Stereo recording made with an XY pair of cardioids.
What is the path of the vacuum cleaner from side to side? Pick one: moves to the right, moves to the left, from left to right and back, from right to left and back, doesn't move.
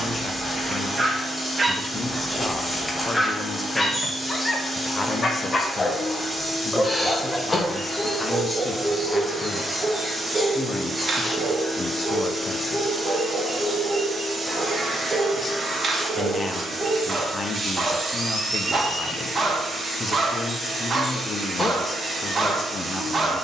moves to the right.